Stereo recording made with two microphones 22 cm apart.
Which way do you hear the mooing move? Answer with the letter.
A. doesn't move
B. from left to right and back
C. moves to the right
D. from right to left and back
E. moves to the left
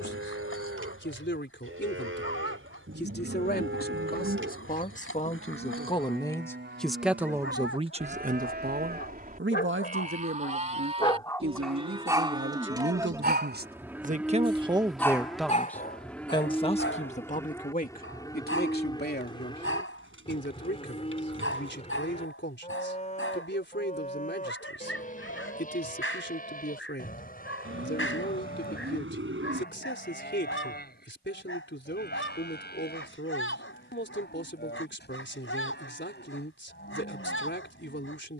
E.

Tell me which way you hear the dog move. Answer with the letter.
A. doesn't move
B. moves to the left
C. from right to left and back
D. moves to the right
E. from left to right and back
E.